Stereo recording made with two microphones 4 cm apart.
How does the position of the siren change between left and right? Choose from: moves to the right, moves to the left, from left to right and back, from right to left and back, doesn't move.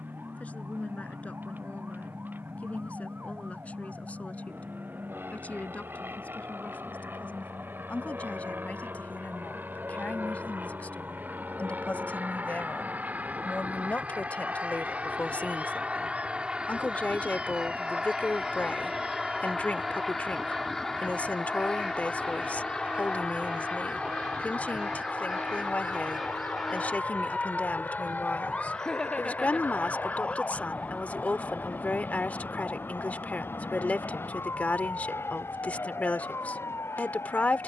moves to the left.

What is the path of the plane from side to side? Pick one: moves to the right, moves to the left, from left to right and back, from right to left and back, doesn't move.
moves to the left.